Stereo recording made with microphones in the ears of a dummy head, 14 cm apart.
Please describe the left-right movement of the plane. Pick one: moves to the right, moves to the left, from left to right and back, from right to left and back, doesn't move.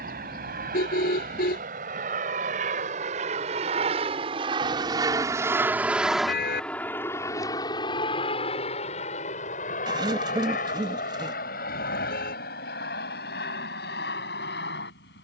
moves to the left.